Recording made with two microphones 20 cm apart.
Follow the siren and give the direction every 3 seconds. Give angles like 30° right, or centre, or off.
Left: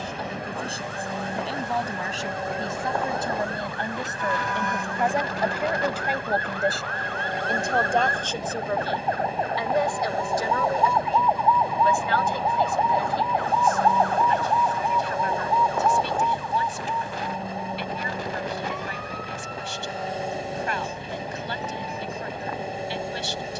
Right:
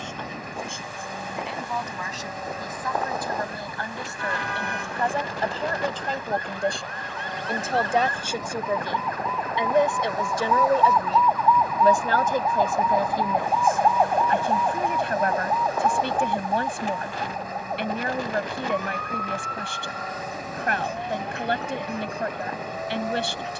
80° left, 70° left, 60° left, 30° left, 10° right, 40° right, 60° right, 60° right.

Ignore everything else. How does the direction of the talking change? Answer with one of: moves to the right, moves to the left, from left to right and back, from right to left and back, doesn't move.
moves to the right.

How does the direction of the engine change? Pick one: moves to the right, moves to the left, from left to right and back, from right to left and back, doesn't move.
doesn't move.